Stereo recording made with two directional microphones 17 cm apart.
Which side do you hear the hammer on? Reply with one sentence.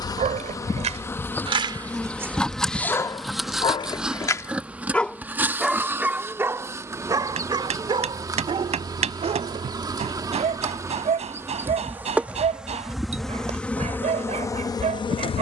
You can hear the hammer on the right.